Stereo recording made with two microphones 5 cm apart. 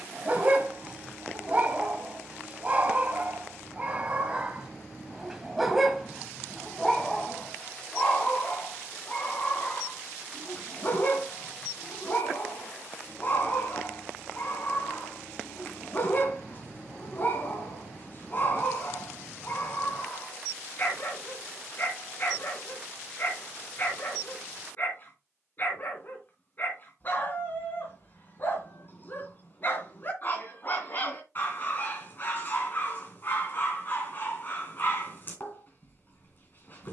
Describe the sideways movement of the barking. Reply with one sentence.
In this clip you hear the barking travel towards the left.